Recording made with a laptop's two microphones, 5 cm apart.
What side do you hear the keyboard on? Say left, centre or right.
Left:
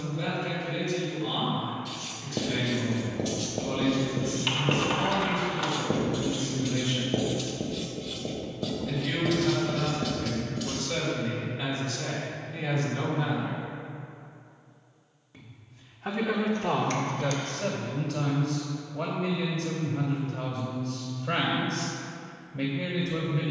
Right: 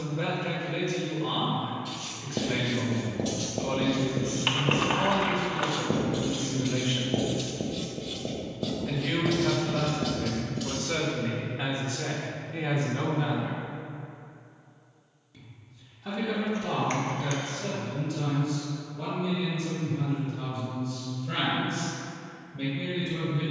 right.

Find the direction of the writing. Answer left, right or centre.
centre.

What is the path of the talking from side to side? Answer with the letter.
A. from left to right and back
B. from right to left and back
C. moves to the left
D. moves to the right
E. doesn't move
C.